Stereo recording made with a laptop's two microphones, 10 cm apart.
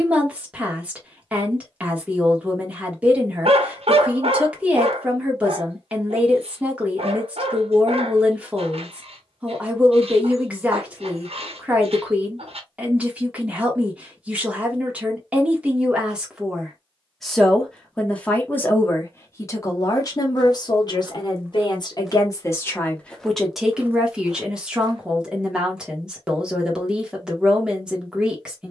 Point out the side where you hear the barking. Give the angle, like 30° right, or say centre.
90° right.